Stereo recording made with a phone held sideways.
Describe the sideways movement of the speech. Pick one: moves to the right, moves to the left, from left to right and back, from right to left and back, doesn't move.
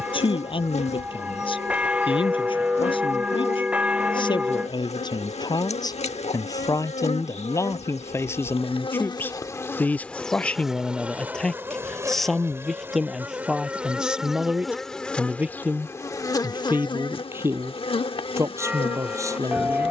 moves to the right.